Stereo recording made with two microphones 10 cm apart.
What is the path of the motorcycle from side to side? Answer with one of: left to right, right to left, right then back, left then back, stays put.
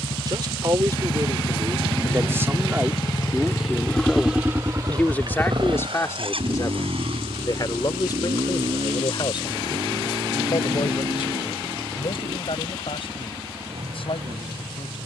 left to right.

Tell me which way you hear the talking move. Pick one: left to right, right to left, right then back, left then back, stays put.
right to left.